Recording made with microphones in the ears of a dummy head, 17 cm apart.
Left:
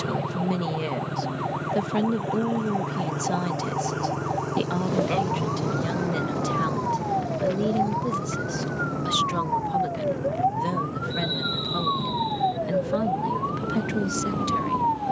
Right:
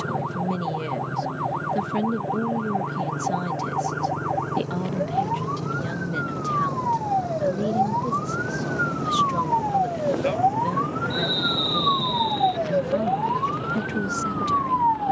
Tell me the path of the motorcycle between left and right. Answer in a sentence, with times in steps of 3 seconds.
You can hear the motorcycle on the left from 0 s, in the centre from 6 s and on the right from 9 s.